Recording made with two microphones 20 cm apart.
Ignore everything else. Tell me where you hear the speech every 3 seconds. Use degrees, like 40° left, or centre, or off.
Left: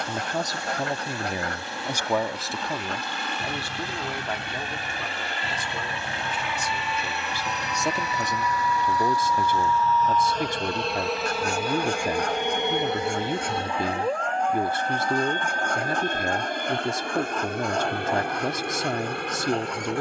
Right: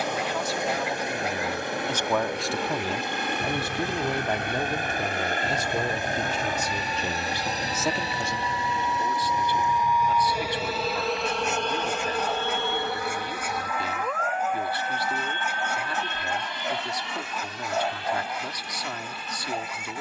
20° left, 30° right, 10° right, 50° left, 50° left, 50° left, 50° left.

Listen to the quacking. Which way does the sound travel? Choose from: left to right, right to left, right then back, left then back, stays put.
stays put.